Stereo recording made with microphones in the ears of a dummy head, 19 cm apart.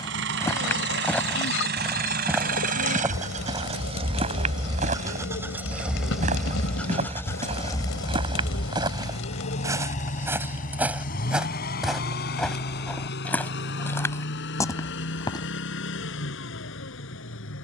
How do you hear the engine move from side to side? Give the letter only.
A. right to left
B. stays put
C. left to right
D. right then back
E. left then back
A.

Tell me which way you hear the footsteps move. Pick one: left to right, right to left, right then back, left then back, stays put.
right then back.